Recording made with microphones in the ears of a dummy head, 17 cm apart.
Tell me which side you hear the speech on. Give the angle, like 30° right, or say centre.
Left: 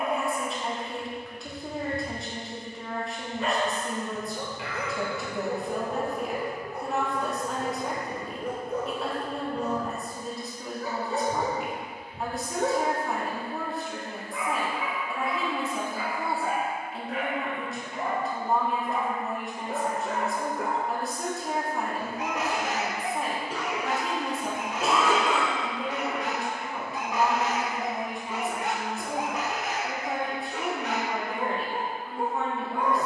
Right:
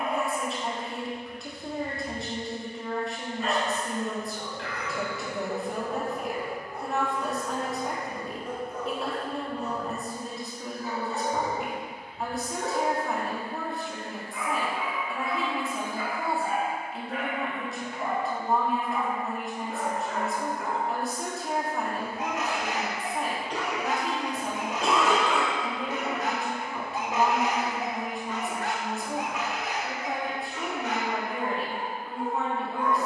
centre.